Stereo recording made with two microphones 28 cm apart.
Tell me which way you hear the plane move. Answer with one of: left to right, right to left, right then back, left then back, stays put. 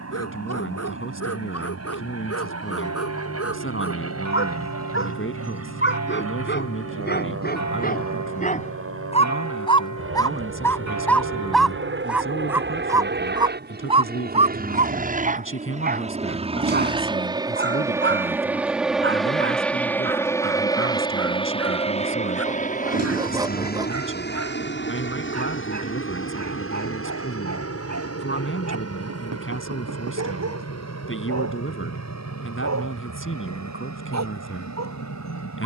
right to left.